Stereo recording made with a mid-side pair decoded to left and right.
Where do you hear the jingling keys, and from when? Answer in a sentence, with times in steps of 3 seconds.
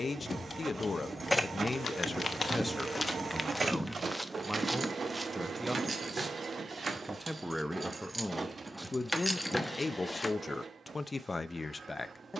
You can hear the jingling keys in the centre from 0 s, on the right from 3 s and in the centre from 9 s.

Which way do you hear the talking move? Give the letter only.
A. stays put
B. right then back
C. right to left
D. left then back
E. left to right
B.